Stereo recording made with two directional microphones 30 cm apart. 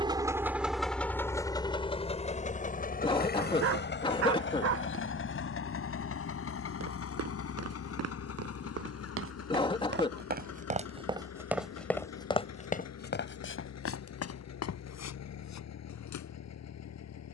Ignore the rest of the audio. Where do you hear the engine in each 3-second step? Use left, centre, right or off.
centre, left, left, left, left, left.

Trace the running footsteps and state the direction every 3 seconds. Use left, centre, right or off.
off, off, right, right, left, left.